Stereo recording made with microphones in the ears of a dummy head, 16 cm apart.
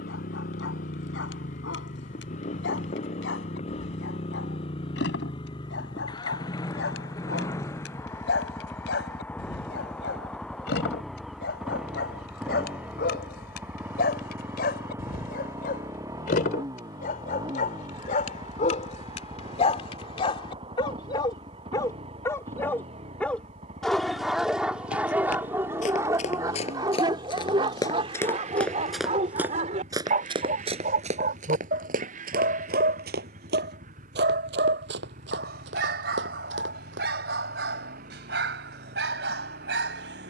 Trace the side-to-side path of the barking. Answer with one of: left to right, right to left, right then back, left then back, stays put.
left to right.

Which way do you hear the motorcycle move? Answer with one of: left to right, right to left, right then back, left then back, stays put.
left to right.